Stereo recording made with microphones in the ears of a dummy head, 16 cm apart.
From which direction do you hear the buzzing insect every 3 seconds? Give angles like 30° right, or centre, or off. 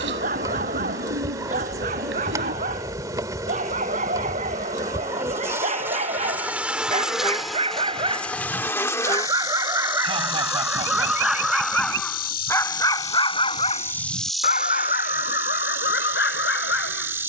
20° right, 20° right, centre, 30° left, 20° left, 10° right.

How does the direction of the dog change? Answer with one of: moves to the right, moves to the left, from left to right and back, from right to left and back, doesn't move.
moves to the left.